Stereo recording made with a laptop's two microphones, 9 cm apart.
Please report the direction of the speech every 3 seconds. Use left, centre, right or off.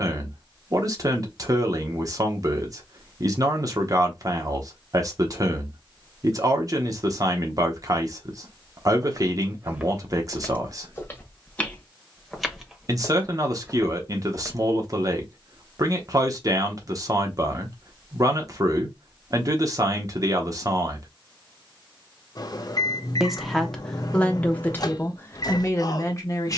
right, right, right, right, right, right, right, centre, left.